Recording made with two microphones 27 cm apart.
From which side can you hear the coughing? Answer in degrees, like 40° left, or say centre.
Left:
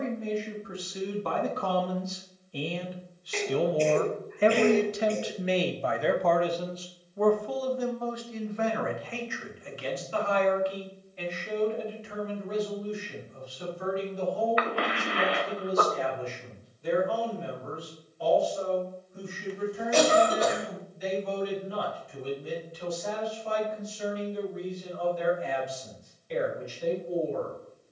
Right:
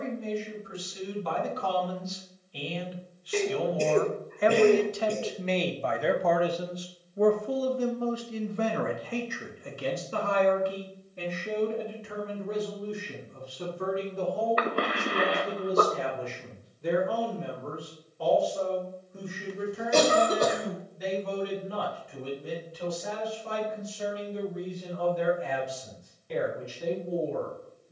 50° right.